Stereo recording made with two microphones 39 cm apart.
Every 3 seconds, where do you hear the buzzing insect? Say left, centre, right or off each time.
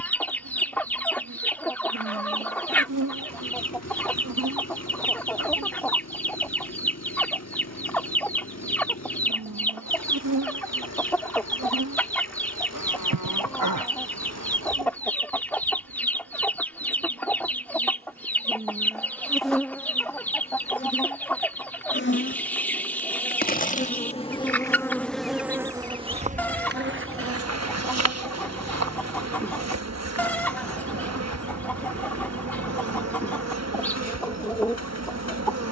right, right, off, right, right, right, centre, left, centre, right, right, right.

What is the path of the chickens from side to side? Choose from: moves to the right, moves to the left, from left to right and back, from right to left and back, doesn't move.
doesn't move.